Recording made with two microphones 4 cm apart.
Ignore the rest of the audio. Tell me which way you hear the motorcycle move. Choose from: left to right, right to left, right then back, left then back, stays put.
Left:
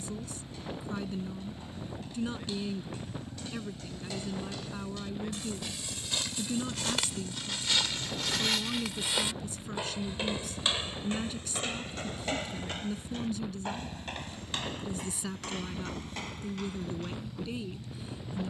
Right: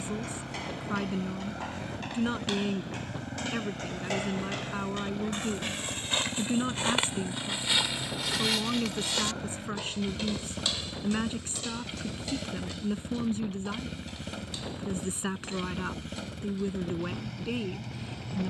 stays put.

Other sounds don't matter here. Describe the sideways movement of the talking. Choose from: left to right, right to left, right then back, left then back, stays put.
stays put.